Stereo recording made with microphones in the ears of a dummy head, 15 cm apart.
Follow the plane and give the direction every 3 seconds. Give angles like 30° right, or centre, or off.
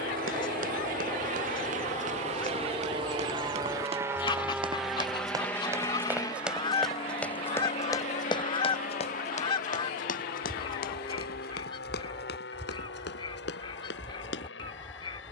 50° right, 10° right, 30° left, 50° left, 60° left.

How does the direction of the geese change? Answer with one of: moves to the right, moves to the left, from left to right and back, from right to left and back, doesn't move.
doesn't move.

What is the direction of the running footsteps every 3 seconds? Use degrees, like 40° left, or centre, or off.
50° right, 30° right, 10° left, 60° left, 70° left.